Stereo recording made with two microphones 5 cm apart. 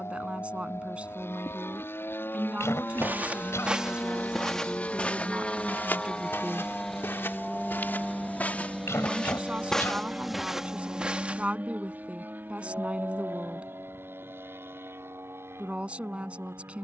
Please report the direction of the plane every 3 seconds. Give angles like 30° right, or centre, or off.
50° left, 30° left, centre, 20° right, 40° right, 50° right.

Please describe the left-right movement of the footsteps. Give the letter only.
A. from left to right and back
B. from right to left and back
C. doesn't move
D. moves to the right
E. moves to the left
B.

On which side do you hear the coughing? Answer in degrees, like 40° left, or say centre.
60° left.